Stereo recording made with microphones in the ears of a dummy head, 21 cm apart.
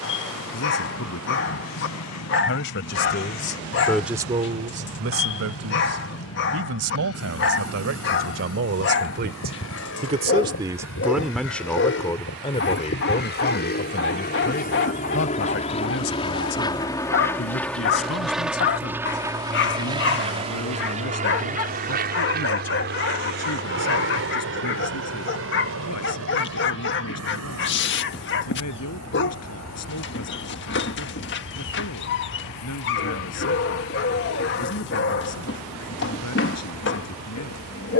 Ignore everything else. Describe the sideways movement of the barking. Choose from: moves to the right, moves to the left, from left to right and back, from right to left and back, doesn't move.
doesn't move.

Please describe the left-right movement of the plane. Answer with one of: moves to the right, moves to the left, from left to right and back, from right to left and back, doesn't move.
moves to the right.